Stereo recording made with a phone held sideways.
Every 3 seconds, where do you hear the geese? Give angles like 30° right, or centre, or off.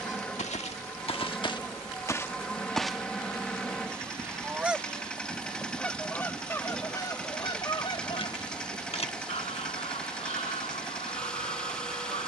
30° left, centre, 30° left, 50° left.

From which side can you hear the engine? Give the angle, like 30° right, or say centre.
10° left.